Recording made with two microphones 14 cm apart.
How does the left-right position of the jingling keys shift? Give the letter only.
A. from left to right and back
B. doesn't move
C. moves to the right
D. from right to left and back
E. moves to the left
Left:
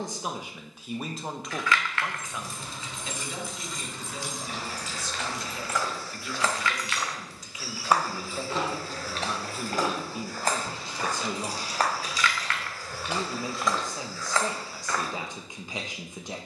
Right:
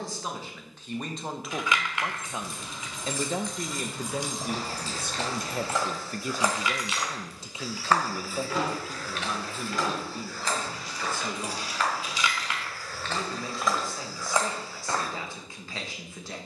A.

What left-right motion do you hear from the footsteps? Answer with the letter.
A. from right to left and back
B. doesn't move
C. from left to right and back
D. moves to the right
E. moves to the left
A.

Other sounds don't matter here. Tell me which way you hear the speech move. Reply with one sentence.
In this clip you hear the speech go right and come back.